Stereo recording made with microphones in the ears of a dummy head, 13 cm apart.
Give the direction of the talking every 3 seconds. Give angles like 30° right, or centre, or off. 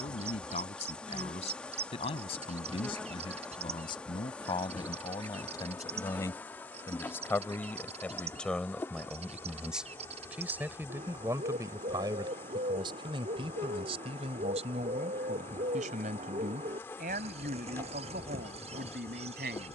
40° left, 30° left, 10° left, 10° right, 40° right, 60° right, 70° right.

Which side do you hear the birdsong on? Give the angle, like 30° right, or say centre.
50° right.